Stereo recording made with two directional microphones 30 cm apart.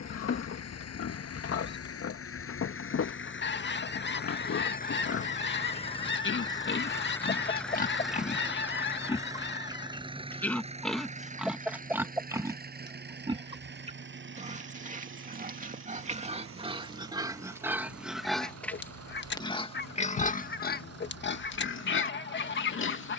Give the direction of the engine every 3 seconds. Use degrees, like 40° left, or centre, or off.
50° left, 30° left, centre, 20° right, 30° right, 40° right, 50° right, 50° right.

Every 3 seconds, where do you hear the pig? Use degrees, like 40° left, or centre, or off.
50° left, 50° left, 30° left, centre, 20° right, 20° right, 10° left, 40° left.